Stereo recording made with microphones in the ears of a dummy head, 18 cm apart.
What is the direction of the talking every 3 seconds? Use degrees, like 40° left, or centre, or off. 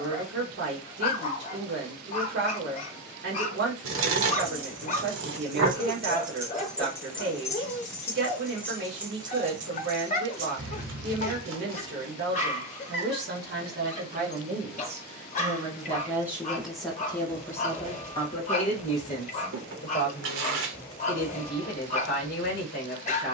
50° right, 50° right, 50° right, 50° right, 40° right, centre, 40° left, 50° left.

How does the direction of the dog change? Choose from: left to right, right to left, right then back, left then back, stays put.
stays put.